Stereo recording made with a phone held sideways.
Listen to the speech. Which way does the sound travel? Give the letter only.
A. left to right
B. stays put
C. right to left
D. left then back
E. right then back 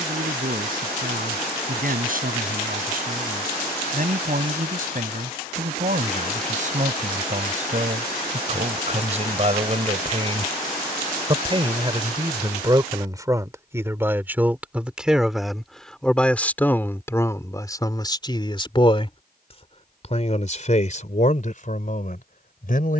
C.